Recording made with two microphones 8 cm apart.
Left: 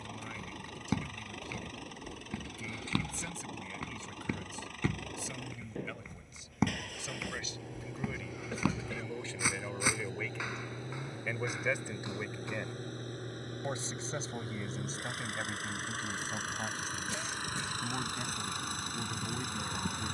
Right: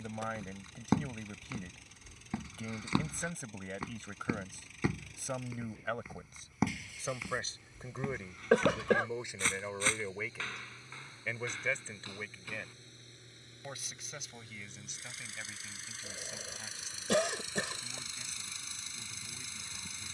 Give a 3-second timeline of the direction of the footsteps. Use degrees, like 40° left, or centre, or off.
20° right, 10° right, centre, 10° left, 20° left, off, off.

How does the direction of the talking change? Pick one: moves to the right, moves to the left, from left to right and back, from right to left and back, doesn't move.
moves to the left.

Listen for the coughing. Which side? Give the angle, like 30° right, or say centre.
80° right.